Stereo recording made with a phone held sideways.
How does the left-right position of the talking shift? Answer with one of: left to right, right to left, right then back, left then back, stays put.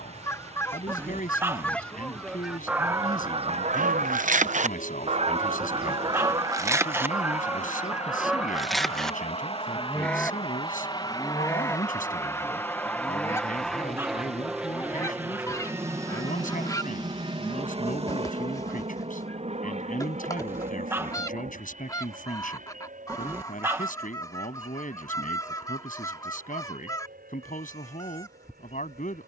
stays put.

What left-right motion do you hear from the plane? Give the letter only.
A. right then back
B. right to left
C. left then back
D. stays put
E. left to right
E.